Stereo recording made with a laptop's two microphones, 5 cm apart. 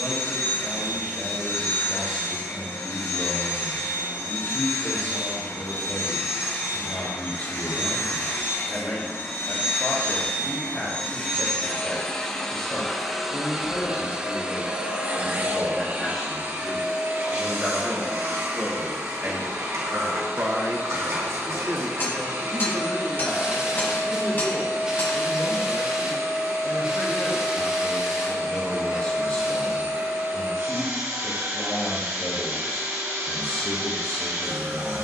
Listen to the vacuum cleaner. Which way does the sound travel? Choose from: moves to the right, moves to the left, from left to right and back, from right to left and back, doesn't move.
moves to the right.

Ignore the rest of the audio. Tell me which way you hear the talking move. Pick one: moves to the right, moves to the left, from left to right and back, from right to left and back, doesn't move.
from left to right and back.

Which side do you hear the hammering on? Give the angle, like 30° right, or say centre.
40° left.